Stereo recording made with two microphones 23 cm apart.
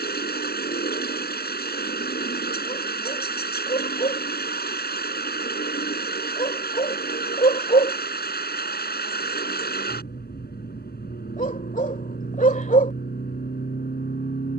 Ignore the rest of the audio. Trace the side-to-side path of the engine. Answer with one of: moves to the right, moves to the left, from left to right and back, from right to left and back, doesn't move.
doesn't move.